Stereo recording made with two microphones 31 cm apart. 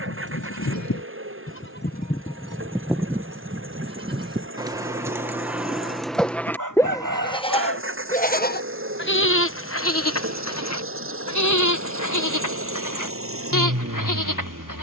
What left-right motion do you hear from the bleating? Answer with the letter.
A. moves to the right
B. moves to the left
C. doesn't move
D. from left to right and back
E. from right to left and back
D.